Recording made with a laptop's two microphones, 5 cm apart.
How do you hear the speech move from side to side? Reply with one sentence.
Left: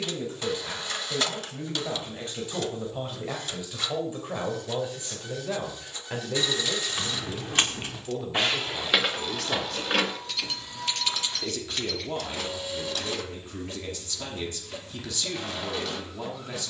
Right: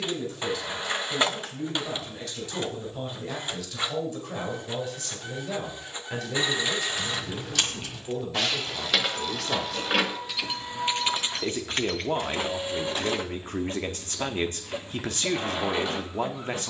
You can hear the speech move to the right.